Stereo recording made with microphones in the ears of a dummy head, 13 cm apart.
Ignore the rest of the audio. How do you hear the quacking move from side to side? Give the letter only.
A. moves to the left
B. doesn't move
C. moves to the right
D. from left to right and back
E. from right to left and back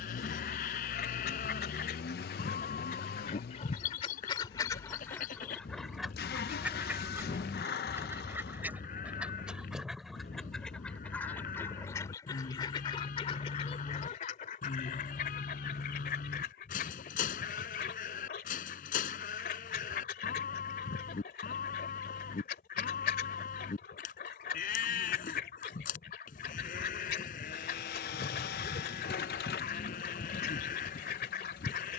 D.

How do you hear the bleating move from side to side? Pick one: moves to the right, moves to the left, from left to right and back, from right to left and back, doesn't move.
doesn't move.